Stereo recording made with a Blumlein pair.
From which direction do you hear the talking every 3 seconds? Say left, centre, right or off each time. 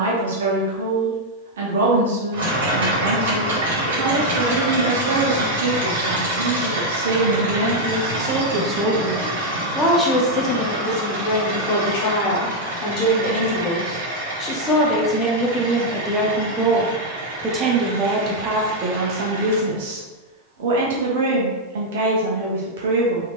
right, right, right, left, left, centre, right, right.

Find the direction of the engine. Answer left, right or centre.
right.